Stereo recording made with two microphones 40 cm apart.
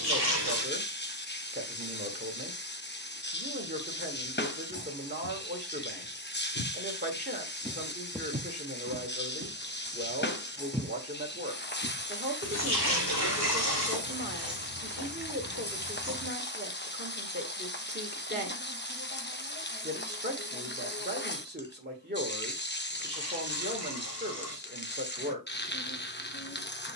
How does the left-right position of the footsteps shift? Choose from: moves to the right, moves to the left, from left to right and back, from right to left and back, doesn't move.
from left to right and back.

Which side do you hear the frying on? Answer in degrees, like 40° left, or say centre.
30° left.